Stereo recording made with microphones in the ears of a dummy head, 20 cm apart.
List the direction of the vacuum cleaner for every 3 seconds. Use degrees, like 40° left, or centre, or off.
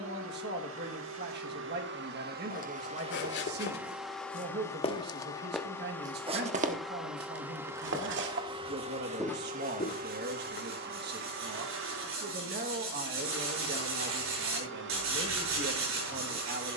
60° right, centre, 10° right, 50° right, 60° right, 60° right.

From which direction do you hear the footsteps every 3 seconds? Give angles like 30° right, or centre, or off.
60° left, 40° left, 50° right, 30° left, off, off.